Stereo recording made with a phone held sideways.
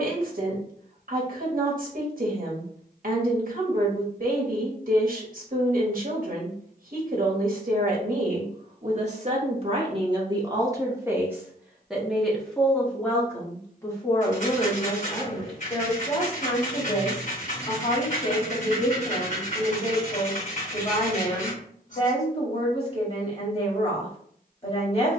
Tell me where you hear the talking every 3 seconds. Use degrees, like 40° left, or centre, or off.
60° right, 60° right, 60° right, 30° right, 10° left, 30° left, 30° left, 30° left, 30° left.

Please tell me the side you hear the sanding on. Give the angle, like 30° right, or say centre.
50° left.